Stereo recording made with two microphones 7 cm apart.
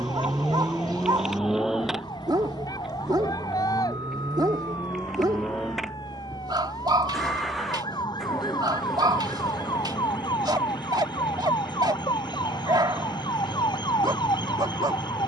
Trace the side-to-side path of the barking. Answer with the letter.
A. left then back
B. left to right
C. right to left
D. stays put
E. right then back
D.